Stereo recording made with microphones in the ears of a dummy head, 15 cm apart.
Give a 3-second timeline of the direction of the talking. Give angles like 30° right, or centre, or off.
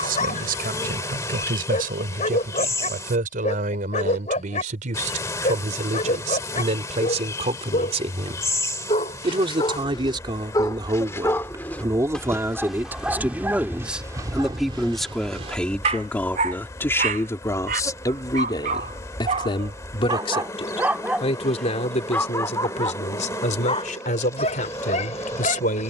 60° right, 50° right, 40° right, 30° right, 10° right, 10° left, 30° left, 40° left, 50° left.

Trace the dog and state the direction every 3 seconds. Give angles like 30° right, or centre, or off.
40° left, 40° left, 40° left, 20° left, 10° right, 40° right, 30° right, 20° left, 40° left.